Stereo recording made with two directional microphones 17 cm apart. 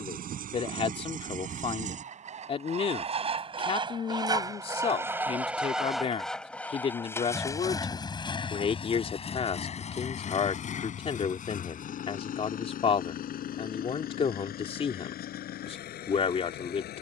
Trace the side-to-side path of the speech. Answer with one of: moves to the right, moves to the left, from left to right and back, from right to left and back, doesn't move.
doesn't move.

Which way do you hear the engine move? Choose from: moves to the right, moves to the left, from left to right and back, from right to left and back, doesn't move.
moves to the left.